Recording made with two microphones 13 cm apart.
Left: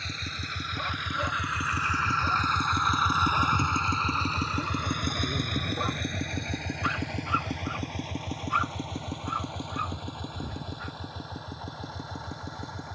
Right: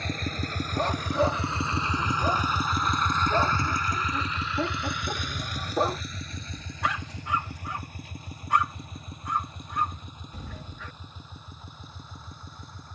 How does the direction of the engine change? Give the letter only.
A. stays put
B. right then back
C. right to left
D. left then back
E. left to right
C.